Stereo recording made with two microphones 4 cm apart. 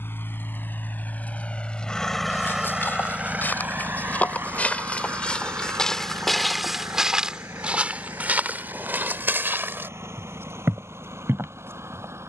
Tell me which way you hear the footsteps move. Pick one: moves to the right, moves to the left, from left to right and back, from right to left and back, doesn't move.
moves to the right.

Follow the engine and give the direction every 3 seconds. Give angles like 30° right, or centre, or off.
30° left, 50° right, 70° right, 80° right.